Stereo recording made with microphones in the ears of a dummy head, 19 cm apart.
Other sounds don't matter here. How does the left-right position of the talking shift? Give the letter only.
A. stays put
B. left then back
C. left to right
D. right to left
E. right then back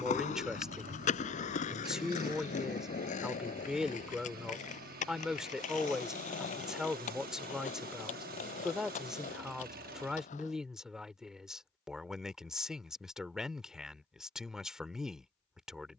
A.